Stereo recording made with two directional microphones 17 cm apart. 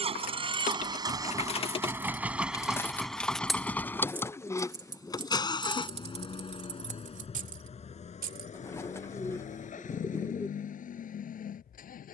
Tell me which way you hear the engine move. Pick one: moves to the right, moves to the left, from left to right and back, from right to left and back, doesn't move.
moves to the left.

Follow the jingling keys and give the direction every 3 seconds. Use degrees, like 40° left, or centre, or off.
30° left, 10° right, 40° right, off.